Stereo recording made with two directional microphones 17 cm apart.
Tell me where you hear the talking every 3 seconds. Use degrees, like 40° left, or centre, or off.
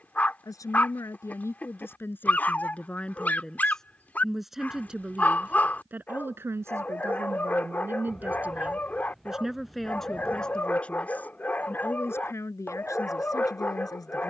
10° left, centre, 10° right, centre, 20° left.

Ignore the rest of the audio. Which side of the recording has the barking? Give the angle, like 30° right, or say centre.
10° left.